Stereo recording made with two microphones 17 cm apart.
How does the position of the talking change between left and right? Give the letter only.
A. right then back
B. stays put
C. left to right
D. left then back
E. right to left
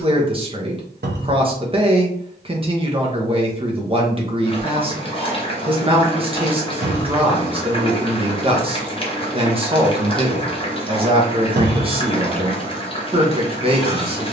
B.